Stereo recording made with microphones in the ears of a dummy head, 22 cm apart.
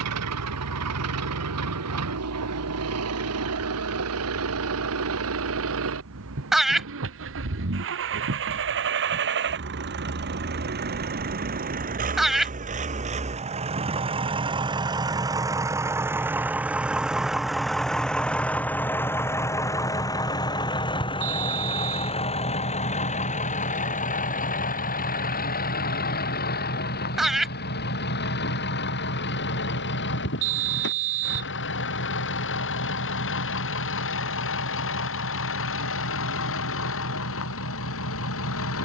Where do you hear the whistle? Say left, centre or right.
right.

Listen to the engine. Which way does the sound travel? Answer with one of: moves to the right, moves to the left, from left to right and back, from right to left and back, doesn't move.
moves to the left.